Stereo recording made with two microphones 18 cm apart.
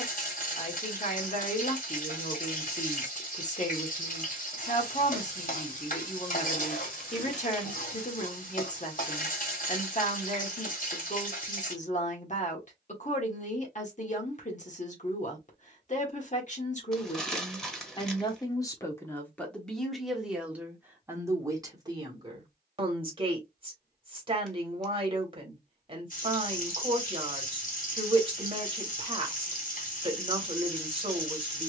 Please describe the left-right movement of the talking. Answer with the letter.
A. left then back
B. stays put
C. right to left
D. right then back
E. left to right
E.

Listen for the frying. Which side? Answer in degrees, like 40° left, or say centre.
50° left.